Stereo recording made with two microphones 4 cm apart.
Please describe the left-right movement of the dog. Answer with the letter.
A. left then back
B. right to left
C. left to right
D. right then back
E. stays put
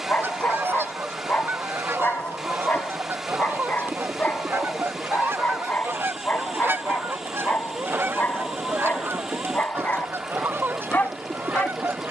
E.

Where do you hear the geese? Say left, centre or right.
right.